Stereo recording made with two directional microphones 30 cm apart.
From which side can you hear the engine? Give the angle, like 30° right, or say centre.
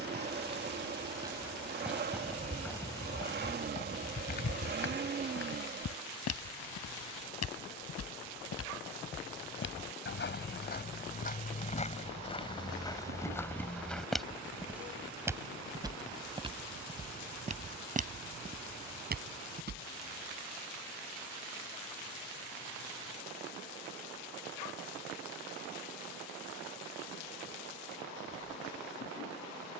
30° right.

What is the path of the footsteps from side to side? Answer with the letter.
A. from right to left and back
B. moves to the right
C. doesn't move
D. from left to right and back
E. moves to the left
A.